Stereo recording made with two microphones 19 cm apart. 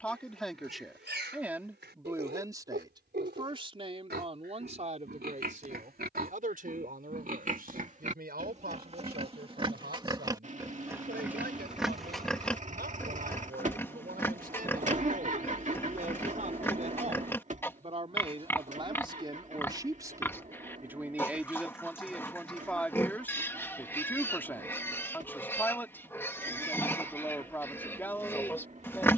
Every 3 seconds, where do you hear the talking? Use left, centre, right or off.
centre, right, right, right, right, right, right, centre, centre, centre.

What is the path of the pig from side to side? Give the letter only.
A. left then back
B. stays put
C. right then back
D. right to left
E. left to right
D.